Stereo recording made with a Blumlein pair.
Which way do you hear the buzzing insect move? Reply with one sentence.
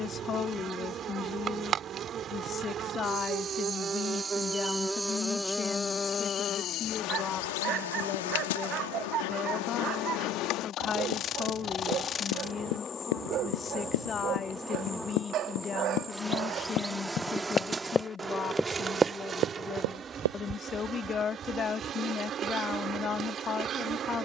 You can hear the buzzing insect move from right to left and back again.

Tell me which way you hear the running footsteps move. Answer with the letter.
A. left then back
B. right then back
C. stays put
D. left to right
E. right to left
D.